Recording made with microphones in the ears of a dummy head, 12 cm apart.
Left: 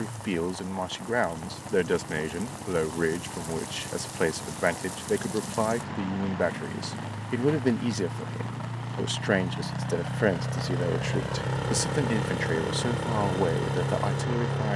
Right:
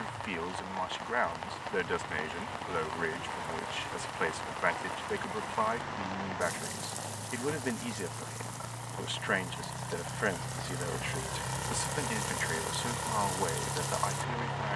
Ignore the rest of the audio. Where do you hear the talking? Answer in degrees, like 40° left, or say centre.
50° left.